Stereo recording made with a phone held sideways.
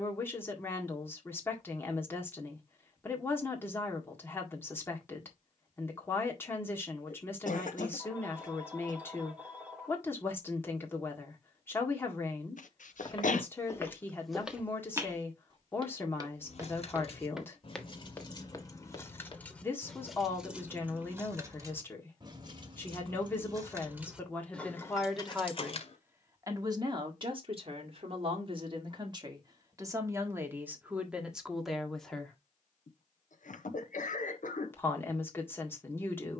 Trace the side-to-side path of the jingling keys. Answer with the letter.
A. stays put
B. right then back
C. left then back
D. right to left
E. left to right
B.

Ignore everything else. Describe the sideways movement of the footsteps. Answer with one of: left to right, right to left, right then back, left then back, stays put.
right then back.